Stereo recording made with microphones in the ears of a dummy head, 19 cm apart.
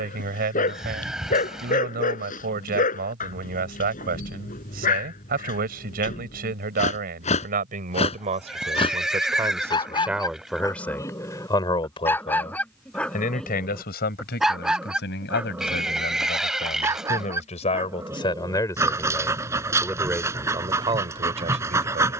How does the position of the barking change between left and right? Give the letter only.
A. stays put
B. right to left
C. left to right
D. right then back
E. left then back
C.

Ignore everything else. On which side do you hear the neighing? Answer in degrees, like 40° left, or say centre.
centre.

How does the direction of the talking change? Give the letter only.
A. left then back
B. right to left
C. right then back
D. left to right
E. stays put
A.